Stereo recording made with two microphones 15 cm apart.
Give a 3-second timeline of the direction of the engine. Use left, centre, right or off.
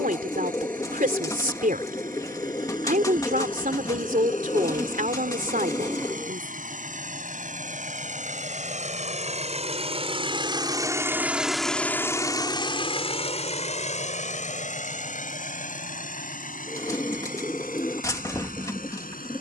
right, right, right, right, left, left, left.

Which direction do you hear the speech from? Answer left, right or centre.
right.